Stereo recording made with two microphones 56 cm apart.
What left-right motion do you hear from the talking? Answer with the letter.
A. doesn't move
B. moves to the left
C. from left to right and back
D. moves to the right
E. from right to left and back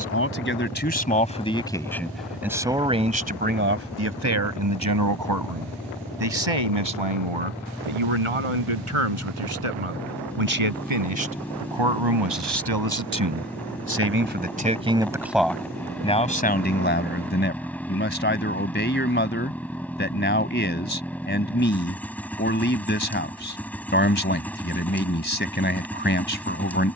C.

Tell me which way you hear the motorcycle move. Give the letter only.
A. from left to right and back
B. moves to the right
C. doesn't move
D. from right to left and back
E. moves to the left
C.